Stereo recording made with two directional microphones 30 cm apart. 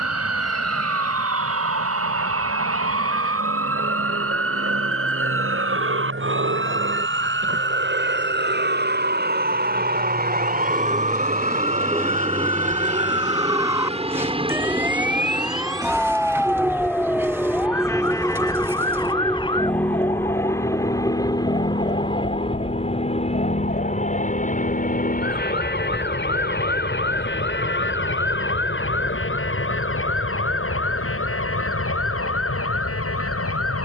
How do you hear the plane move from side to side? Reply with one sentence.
In this clip you hear the plane go from the right side to the left.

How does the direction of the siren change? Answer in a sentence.
You can hear the siren travel towards the left.